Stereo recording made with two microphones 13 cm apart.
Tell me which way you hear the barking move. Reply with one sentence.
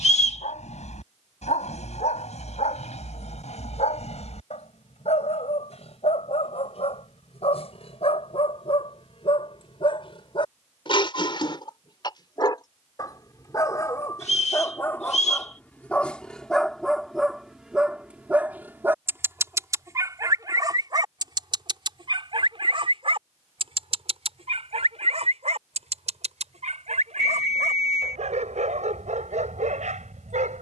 You can hear the barking travel towards the right.